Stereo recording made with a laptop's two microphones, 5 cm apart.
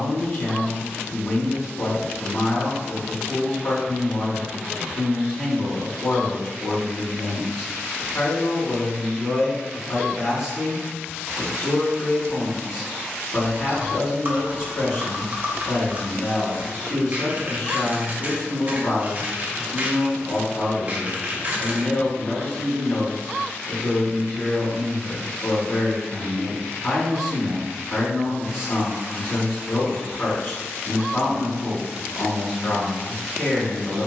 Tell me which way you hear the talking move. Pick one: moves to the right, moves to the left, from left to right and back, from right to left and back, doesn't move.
doesn't move.